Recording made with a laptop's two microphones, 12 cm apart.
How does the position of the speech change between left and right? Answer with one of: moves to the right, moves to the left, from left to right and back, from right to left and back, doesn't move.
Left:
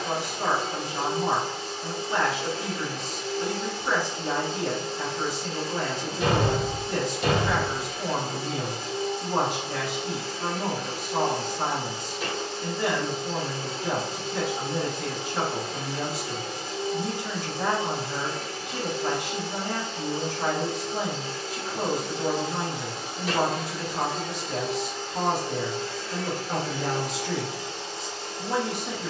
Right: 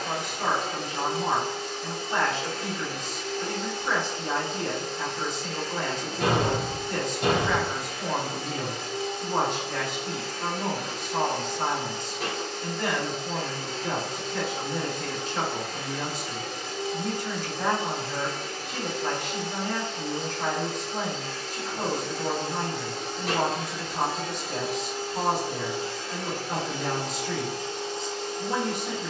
doesn't move.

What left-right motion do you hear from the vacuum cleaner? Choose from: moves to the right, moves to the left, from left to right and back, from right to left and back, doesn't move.
moves to the right.